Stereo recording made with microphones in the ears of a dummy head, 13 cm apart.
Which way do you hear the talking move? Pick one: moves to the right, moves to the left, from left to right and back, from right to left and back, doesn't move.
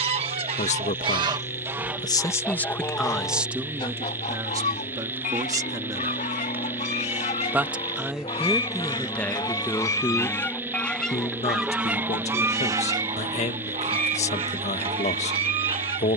from left to right and back.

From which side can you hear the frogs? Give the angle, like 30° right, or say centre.
20° right.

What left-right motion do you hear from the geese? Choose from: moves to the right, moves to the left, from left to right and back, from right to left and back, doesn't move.
from right to left and back.